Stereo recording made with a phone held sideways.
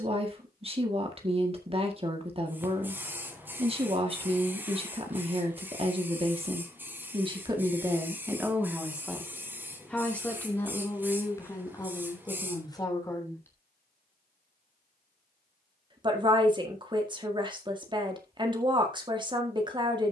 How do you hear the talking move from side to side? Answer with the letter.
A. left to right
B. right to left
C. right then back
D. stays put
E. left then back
E.